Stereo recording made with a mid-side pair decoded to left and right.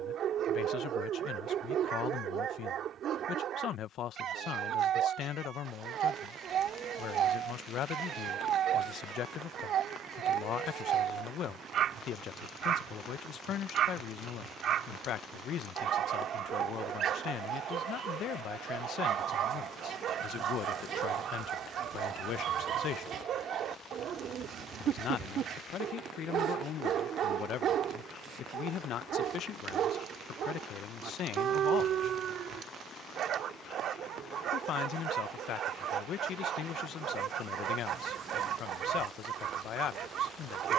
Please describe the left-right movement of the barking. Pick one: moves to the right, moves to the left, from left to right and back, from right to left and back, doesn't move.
doesn't move.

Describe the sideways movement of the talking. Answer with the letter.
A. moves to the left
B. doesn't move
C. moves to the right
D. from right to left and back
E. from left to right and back
B.